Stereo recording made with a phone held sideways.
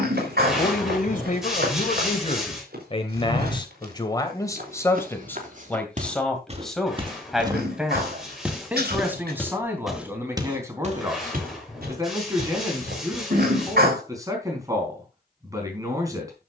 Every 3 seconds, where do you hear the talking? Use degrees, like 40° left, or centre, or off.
50° left, 20° left, centre, 20° right, 20° right, 20° right.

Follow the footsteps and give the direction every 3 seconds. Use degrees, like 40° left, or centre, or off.
80° right, 60° right, 20° right, 30° right, 80° right, off.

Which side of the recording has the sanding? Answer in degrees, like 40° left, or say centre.
centre.